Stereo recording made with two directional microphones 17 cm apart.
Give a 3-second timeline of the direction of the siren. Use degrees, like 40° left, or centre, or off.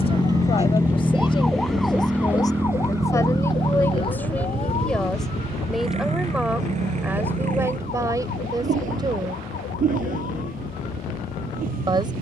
centre, 30° left, 50° left, 50° left.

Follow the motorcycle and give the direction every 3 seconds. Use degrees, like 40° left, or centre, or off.
centre, 30° right, 50° right, 50° right.